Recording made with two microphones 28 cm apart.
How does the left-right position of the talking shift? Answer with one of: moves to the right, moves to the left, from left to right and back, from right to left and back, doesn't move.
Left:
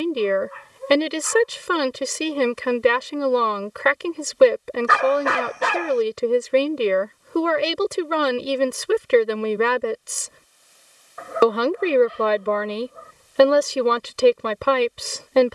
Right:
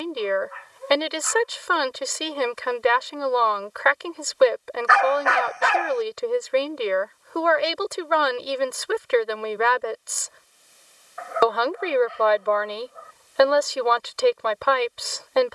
doesn't move.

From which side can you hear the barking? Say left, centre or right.
left.